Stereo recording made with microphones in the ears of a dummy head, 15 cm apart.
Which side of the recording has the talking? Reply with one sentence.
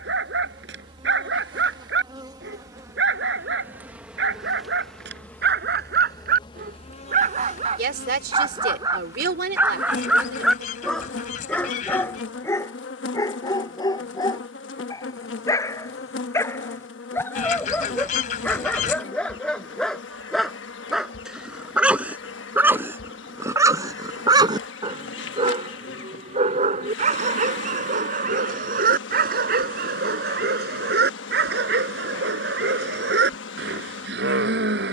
In this clip you hear the talking on the right.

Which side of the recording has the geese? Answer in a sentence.
In this clip you hear the geese on the left.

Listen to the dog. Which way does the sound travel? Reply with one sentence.
In this clip you hear the dog go left and come back.